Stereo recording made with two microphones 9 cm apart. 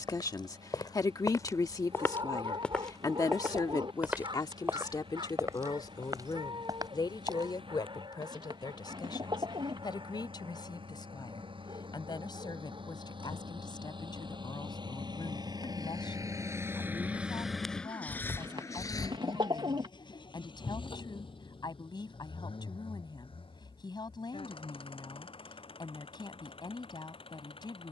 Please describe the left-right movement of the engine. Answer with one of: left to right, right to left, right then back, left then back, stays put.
right to left.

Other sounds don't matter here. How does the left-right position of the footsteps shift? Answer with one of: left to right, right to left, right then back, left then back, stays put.
left to right.